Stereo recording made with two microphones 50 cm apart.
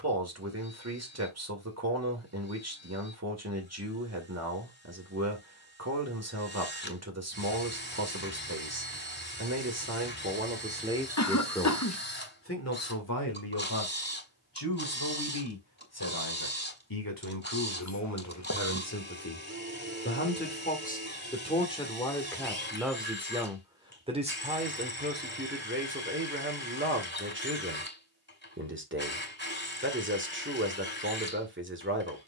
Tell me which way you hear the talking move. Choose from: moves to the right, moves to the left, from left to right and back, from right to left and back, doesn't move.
from right to left and back.